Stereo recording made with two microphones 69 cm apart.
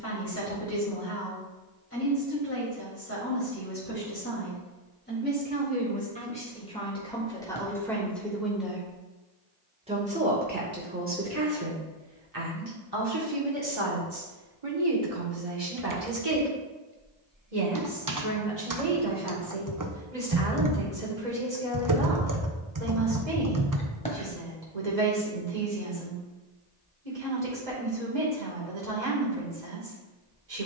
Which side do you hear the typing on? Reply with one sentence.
You can hear the typing on the right.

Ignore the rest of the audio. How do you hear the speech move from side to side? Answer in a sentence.
In this clip you hear the speech move to the right.